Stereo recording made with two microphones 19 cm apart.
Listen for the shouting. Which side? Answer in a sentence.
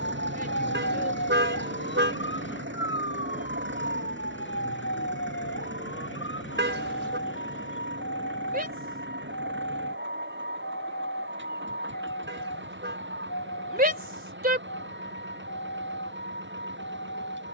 You can hear the shouting on the right.